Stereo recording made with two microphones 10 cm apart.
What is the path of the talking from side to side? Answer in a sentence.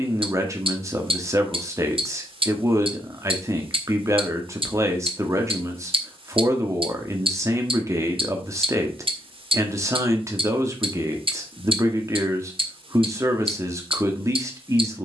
You can hear the talking stay put.